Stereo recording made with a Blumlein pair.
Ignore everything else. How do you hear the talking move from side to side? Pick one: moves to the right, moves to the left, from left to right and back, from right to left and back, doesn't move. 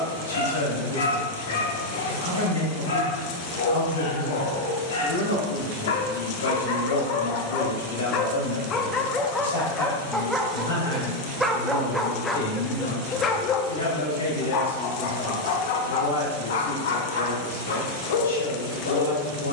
doesn't move.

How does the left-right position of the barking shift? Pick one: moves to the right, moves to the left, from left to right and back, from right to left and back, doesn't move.
from left to right and back.